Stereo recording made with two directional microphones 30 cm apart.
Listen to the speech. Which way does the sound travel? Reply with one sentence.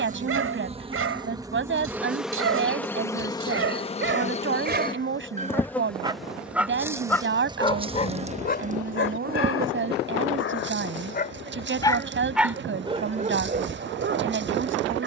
You can hear the speech stay put.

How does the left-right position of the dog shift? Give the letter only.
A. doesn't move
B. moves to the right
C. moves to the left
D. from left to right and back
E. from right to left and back
E.